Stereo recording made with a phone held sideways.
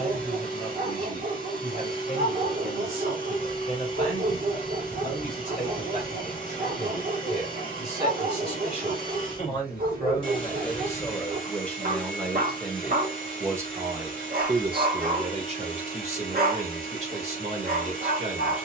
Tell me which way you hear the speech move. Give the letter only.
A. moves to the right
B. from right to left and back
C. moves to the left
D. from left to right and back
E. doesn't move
A.